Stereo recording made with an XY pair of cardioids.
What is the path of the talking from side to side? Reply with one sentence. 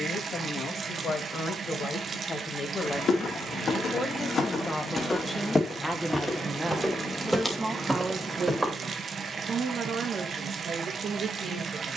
You can hear the talking go from the left side to the right.